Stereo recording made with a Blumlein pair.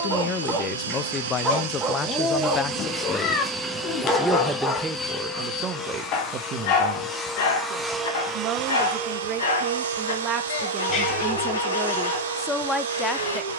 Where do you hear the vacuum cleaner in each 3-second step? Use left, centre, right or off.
right, centre, centre, right, right.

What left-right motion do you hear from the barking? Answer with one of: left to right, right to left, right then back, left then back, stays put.
right to left.